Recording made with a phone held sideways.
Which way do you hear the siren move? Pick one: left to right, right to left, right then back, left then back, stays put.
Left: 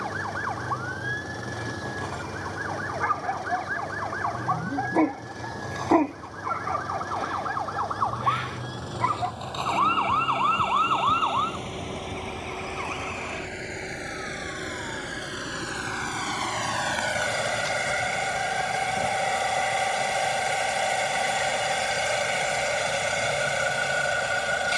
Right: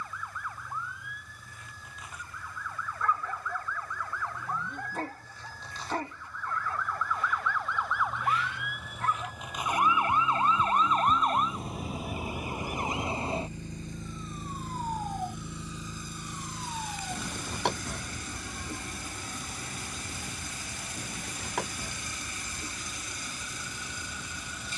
left to right.